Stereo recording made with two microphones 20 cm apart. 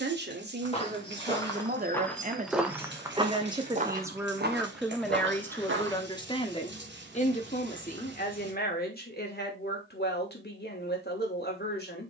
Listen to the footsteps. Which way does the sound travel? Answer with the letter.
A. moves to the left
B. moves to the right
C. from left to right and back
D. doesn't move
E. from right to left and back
B.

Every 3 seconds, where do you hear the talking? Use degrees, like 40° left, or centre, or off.
50° right, 10° right, 40° left, 50° left.